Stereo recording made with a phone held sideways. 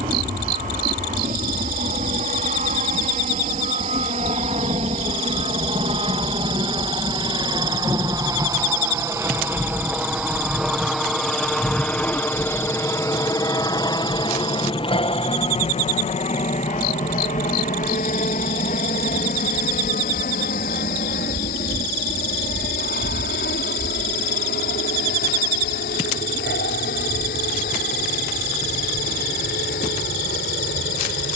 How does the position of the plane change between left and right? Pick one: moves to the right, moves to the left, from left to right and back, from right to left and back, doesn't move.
moves to the left.